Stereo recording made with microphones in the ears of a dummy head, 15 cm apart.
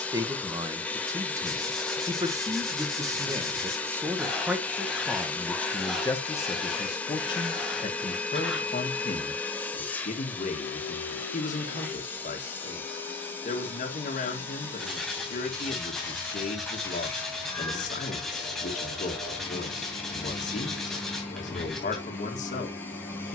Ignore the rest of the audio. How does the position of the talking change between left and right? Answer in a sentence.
In this clip you hear the talking travel towards the left.